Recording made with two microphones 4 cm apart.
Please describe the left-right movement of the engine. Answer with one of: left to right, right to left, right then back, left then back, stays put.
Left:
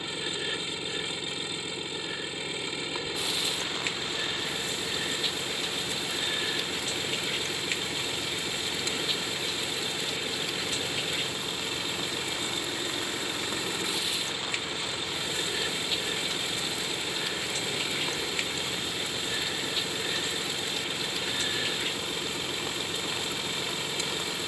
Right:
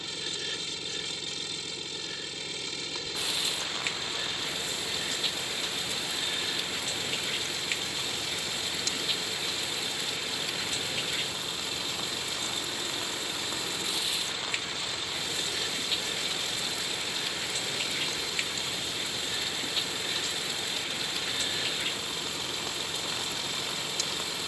stays put.